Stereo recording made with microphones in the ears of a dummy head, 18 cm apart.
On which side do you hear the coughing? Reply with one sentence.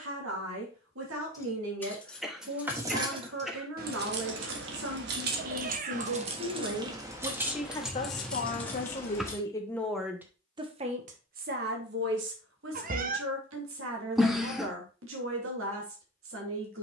In this clip you hear the coughing in the centre.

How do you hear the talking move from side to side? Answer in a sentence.
You can hear the talking move from right to left and back again.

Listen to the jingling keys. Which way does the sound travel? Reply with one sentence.
You can hear the jingling keys go right and come back.